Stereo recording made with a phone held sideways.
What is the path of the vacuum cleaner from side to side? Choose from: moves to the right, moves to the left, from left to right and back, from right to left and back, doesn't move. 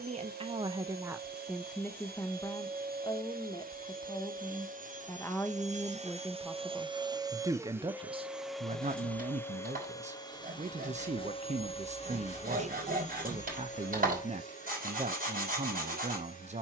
moves to the left.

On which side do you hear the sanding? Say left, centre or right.
right.